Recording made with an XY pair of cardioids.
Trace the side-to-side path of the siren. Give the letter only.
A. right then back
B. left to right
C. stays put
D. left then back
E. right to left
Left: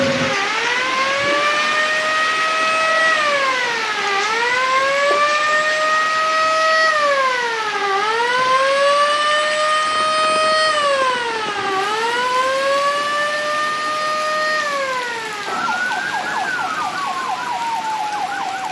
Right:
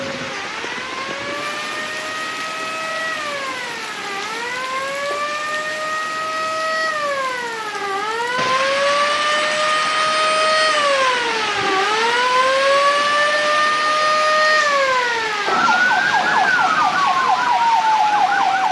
B.